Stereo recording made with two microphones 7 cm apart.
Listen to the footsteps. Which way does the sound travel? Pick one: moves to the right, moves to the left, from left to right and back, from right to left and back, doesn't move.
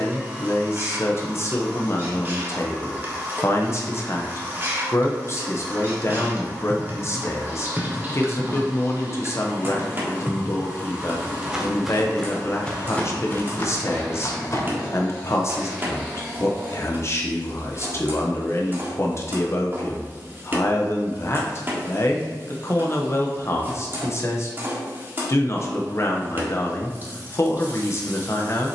from left to right and back.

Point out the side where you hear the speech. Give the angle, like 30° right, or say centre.
40° left.